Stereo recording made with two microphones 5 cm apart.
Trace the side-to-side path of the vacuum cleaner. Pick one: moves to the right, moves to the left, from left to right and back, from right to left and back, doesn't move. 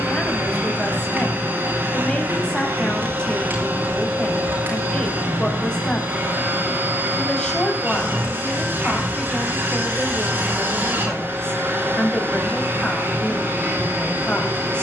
doesn't move.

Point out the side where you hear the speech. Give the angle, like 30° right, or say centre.
20° left.